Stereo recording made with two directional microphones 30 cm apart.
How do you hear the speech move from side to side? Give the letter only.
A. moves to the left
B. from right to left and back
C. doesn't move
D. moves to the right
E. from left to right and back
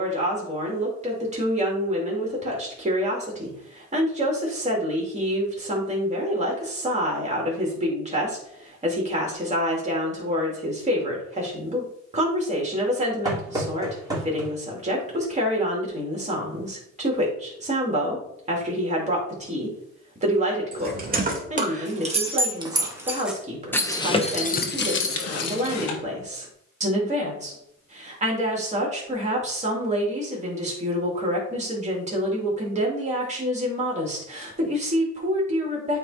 C.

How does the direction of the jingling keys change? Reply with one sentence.
In this clip you hear the jingling keys move from right to left.